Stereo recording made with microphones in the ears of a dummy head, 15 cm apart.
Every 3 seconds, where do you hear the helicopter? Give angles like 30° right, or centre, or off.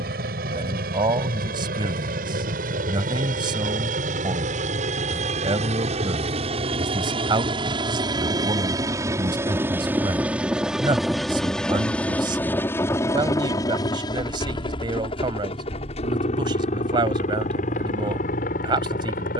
60° right, 50° right, 30° right, 10° right, 20° left, 40° left, 50° left.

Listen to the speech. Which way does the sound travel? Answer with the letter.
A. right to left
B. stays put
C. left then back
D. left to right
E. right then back
B.